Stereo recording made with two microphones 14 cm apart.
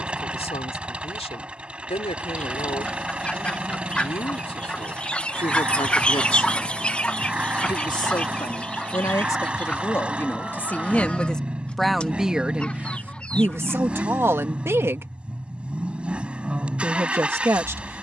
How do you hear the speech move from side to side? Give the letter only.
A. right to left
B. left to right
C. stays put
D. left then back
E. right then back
B.